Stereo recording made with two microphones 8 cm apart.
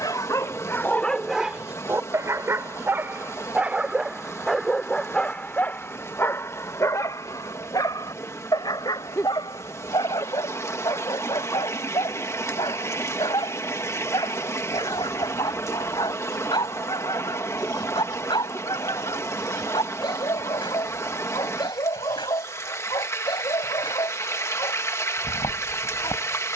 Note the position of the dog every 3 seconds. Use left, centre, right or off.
centre, centre, left, left, left, left, left, left, left.